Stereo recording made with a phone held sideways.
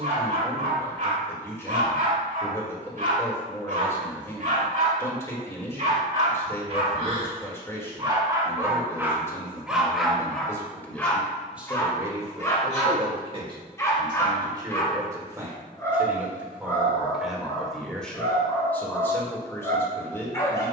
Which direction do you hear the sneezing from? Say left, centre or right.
right.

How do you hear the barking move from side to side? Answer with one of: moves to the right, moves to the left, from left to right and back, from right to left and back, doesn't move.
moves to the left.